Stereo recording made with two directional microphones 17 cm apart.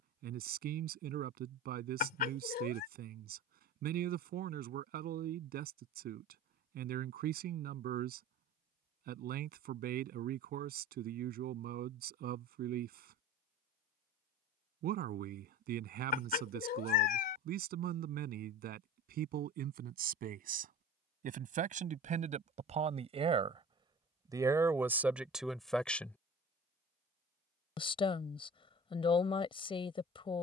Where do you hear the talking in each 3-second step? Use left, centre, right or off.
right, right, right, right, right, right, right, right, centre, left.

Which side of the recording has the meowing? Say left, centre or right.
left.